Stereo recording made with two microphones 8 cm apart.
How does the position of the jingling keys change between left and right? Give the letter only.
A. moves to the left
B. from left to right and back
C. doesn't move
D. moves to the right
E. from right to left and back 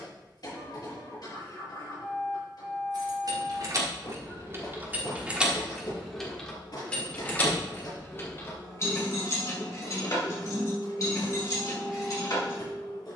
A.